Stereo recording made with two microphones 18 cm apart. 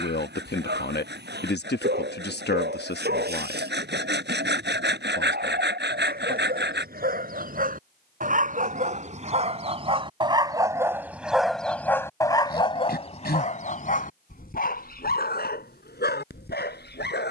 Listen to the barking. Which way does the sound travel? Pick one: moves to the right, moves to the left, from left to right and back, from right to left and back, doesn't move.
moves to the left.